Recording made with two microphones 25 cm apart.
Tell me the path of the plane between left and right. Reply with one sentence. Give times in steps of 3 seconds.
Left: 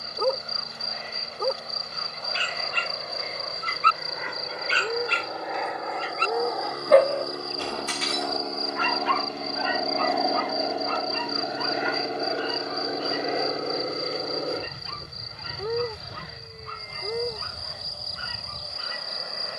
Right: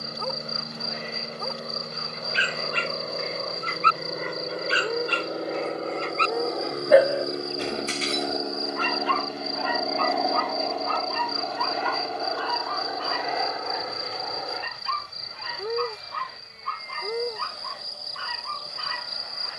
You can hear the plane on the right from 0 s, in the centre from 9 s and on the left from 12 s.